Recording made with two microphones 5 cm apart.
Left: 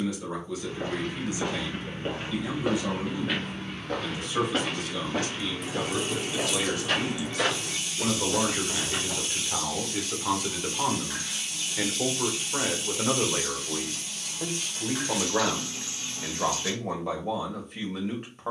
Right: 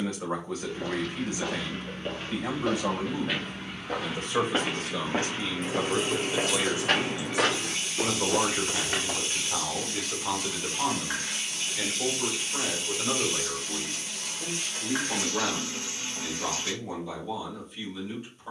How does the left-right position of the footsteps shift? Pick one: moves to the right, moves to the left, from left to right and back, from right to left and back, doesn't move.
moves to the right.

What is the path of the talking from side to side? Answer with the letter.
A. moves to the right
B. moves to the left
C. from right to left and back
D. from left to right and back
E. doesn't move
B.